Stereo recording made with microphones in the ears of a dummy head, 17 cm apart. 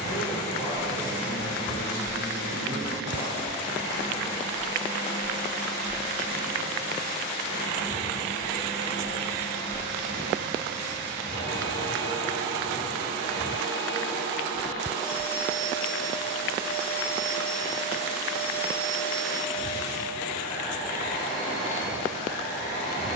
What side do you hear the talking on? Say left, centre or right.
left.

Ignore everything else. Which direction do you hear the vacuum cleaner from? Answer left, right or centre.
left.